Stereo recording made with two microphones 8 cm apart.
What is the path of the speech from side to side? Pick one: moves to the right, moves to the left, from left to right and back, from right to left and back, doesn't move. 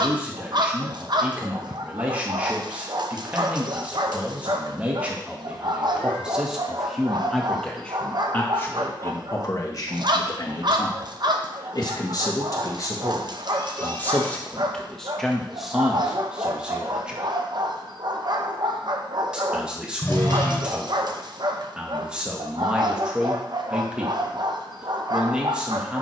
from right to left and back.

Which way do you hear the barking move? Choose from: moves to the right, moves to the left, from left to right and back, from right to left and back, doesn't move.
doesn't move.